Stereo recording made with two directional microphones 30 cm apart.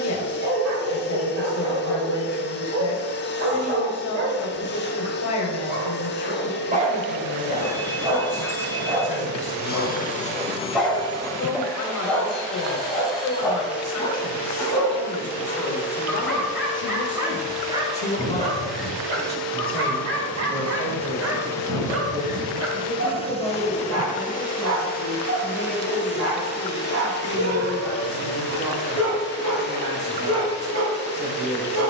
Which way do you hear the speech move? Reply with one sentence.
You can hear the speech move to the right.